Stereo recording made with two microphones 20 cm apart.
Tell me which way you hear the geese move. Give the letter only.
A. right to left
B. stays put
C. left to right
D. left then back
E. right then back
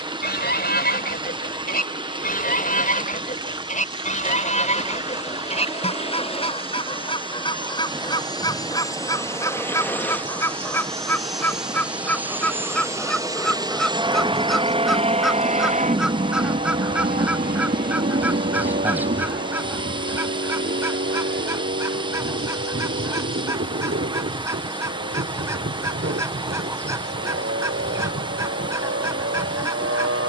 C.